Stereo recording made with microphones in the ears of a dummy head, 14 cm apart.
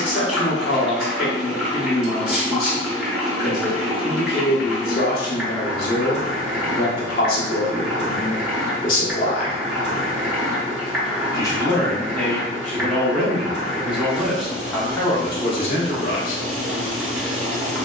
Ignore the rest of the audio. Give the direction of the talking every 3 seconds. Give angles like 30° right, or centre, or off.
60° left, 60° left, 60° left, 30° left, centre, 40° left.